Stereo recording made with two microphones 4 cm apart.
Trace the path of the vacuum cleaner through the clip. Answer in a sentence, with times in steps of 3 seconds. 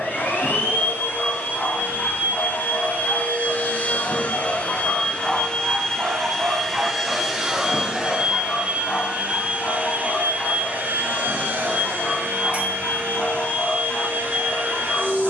You can hear the vacuum cleaner on the left from 0 s, in the centre from 6 s and on the right from 9 s.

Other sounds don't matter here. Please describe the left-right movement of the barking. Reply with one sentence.
You can hear the barking go right and come back.